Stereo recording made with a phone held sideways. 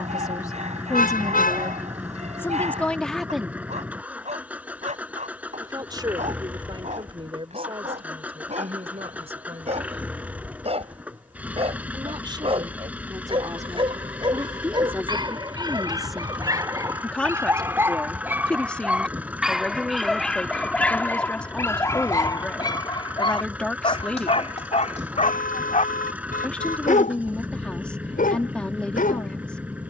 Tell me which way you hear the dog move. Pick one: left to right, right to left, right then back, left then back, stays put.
right to left.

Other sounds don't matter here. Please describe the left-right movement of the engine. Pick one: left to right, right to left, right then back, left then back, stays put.
stays put.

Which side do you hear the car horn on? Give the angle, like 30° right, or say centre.
70° left.